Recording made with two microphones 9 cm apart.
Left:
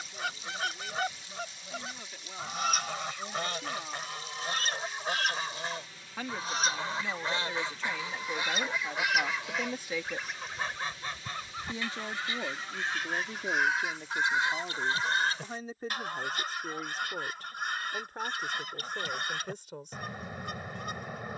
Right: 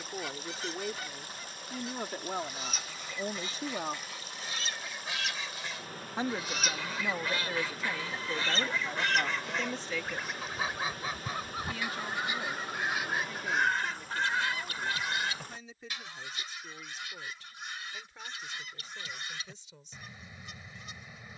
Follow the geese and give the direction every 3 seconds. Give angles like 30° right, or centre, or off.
60° left, 50° left, 20° left, 10° right, centre, 60° left, 60° left.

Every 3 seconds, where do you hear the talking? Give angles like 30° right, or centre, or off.
50° right, 40° right, 10° right, 10° left, 40° left, 50° left, 60° left.